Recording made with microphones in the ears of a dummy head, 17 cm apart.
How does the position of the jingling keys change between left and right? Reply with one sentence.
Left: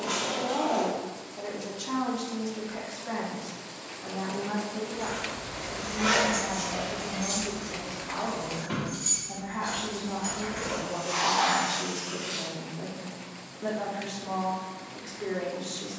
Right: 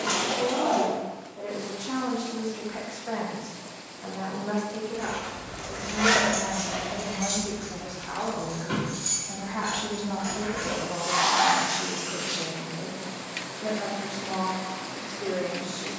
You can hear the jingling keys go right and come back.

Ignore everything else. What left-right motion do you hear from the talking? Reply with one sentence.
In this clip you hear the talking go right and come back.